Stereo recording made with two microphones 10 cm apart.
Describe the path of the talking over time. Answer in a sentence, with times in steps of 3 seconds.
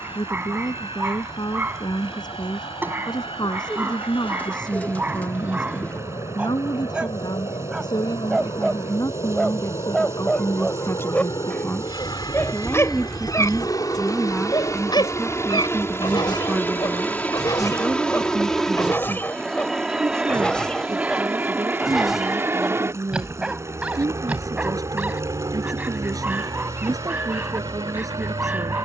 You can hear the talking on the left from 0 s, in the centre from 12 s and on the right from 18 s.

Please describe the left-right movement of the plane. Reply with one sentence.
In this clip you hear the plane go from the left side to the right.